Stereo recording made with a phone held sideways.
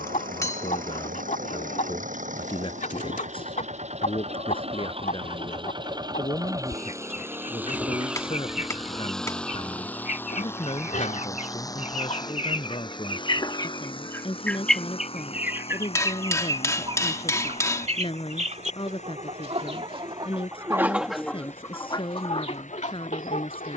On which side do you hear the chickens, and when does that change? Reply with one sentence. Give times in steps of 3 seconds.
In this clip you hear the chickens on the left from 0 s, on the right from 15 s and on the left from 21 s.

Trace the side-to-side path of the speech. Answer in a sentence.
In this clip you hear the speech stay in one place.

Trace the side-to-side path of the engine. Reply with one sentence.
In this clip you hear the engine move from right to left.